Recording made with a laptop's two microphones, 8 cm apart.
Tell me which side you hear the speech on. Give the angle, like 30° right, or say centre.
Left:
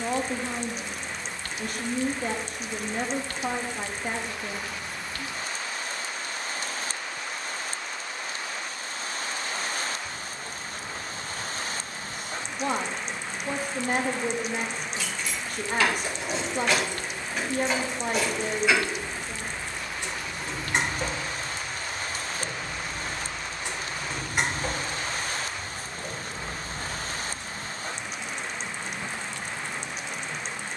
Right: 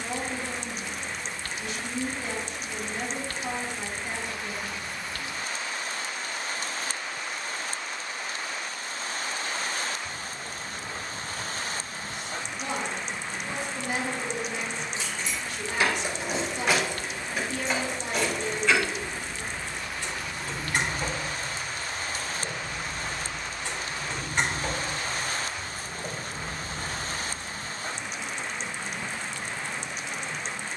50° left.